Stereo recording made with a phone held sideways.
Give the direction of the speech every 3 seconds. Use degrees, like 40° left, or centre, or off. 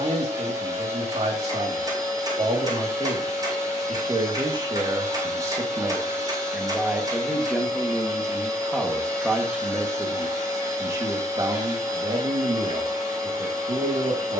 50° right, 30° right, centre, 20° right, 40° right.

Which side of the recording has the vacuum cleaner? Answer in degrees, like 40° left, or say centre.
20° right.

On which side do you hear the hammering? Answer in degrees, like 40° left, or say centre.
30° right.